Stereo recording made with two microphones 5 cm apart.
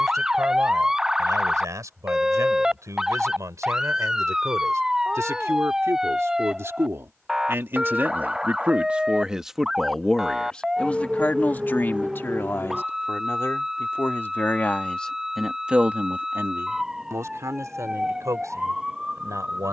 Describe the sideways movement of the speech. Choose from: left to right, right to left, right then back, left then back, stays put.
left then back.